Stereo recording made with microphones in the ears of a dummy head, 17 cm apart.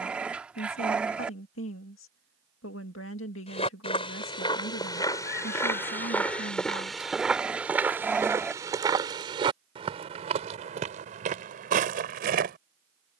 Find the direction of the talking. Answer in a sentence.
You can hear the talking on the left.